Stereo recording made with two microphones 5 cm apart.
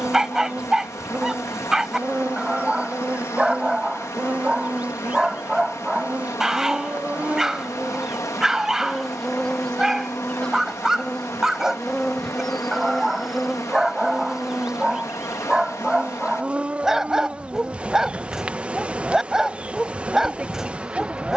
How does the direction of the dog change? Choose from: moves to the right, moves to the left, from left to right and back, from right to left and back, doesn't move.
doesn't move.